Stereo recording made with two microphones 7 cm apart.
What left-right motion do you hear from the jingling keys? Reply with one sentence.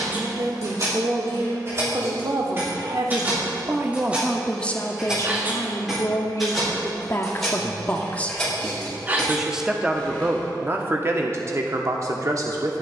In this clip you hear the jingling keys go from the right side to the left.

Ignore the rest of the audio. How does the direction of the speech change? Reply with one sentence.
In this clip you hear the speech move from right to left and back again.